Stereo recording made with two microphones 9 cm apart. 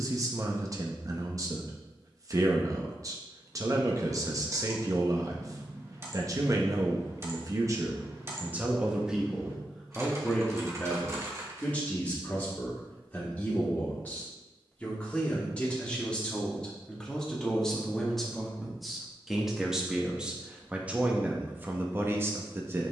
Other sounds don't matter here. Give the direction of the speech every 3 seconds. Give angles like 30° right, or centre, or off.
40° right, 40° right, 30° right, 10° left, 20° left, 10° left, centre, 20° right.